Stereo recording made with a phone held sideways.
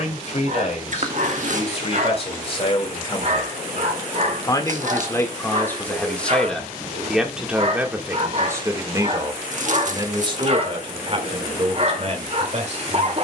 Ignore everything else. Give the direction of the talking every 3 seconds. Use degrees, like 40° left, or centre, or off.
50° left, 20° left, 10° right, 40° right, 50° right.